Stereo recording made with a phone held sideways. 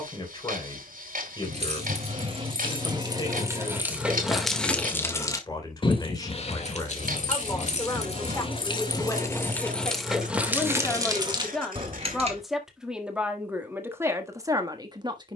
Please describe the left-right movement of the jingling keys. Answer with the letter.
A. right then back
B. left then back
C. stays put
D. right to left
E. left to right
B.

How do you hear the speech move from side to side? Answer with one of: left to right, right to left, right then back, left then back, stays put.
left to right.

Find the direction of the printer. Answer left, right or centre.
right.